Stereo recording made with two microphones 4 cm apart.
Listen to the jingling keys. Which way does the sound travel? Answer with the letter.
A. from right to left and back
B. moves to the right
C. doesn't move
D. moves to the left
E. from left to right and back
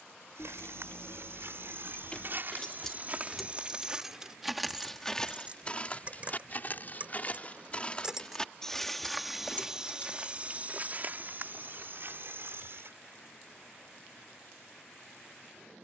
E.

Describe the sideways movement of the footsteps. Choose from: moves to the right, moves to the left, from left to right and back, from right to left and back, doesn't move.
from right to left and back.